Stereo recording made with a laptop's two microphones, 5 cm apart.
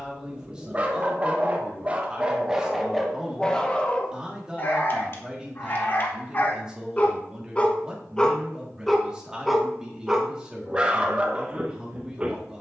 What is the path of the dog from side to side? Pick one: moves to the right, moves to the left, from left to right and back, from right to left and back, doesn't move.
from right to left and back.